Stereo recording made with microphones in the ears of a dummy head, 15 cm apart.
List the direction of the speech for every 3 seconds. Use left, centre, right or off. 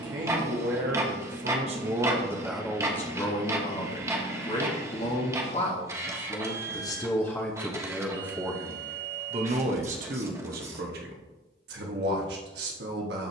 right, left, centre, right, right.